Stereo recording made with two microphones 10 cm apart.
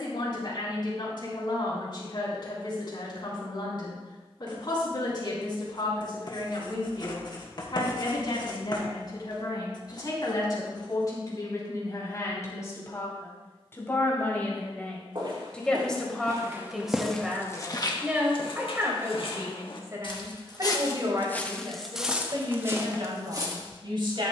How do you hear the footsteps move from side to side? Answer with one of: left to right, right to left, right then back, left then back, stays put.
left then back.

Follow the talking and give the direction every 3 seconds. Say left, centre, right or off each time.
left, left, left, left, left, centre, right, right.